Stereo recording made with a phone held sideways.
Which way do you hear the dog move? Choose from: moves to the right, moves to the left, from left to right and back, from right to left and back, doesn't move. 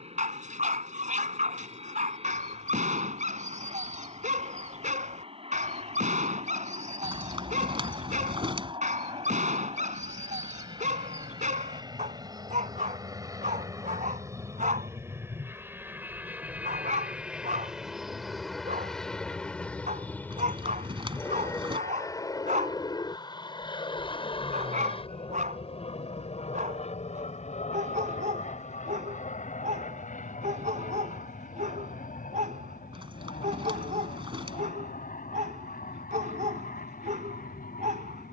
doesn't move.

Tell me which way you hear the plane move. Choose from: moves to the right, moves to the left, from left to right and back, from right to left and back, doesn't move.
moves to the left.